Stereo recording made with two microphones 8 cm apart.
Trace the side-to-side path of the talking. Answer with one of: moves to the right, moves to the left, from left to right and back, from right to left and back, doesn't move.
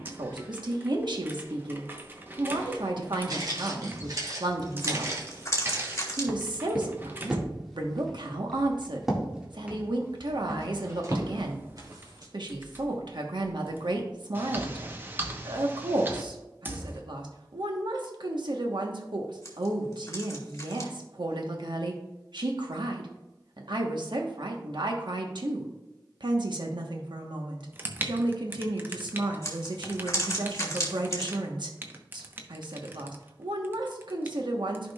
doesn't move.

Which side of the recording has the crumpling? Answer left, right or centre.
left.